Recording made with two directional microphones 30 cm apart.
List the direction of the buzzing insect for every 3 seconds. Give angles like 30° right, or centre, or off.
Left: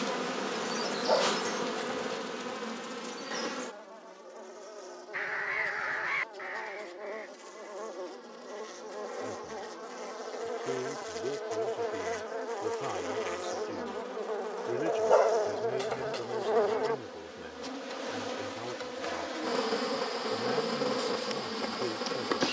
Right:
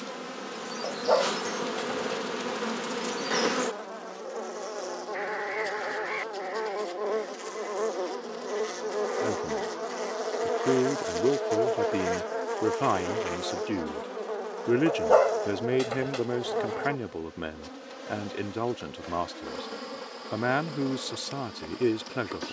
centre, 50° right, 50° right, 30° right, 10° right, 10° left, 30° left, 40° left.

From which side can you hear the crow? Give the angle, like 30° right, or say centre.
20° left.